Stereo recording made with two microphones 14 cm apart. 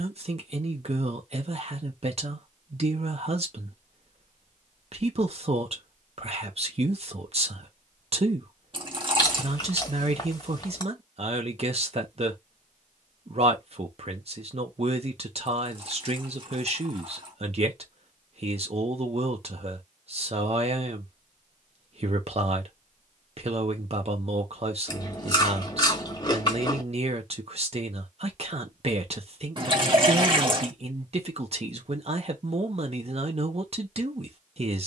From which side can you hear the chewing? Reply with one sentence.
In this clip you hear the chewing on the left.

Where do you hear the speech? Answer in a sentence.
In this clip you hear the speech on the right.